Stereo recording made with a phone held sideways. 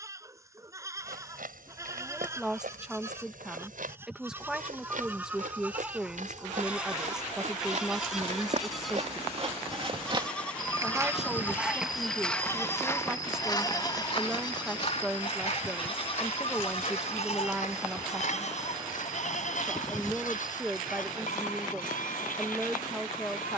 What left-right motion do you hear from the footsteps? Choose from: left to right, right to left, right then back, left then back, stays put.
right to left.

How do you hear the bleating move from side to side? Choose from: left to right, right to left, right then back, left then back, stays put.
right to left.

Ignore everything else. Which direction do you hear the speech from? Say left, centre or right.
centre.